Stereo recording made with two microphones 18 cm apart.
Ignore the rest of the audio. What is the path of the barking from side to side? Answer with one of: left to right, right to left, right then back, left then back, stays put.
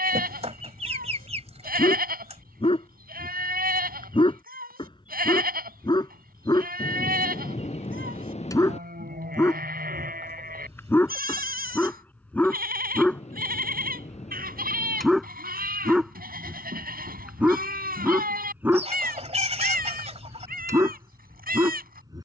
left to right.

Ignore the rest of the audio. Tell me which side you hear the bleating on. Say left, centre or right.
right.